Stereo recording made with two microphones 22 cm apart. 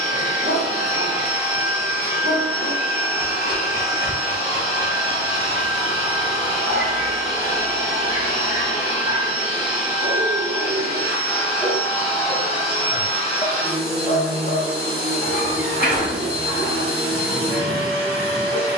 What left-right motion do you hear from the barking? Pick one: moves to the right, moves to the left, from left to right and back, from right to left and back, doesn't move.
moves to the left.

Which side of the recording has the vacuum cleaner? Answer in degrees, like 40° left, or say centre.
30° right.